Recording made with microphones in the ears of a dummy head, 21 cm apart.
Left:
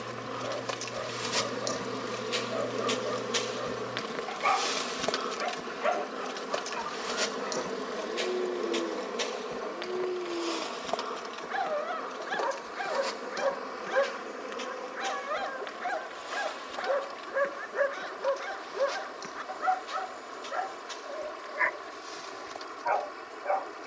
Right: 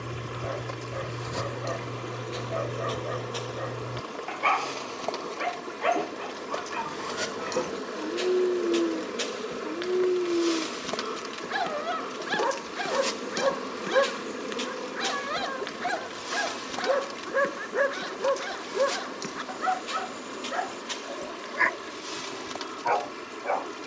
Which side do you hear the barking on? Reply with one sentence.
In this clip you hear the barking on the right.